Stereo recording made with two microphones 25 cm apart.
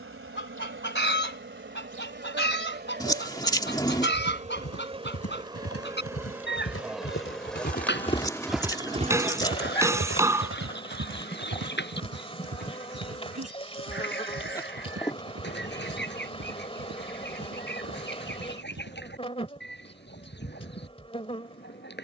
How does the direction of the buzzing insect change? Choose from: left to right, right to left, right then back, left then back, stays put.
right to left.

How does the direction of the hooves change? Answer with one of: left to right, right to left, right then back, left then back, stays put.
left to right.